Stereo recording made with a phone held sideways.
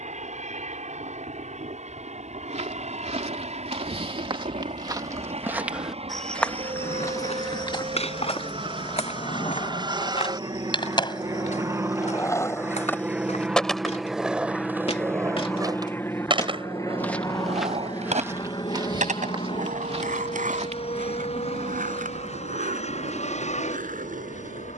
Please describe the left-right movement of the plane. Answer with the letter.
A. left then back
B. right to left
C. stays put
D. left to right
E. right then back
B.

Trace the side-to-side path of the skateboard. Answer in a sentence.
In this clip you hear the skateboard move to the right.